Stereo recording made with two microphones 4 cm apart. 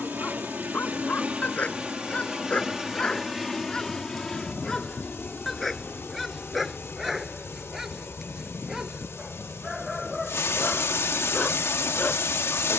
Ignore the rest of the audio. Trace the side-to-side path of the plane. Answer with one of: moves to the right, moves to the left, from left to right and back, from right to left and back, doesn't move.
moves to the left.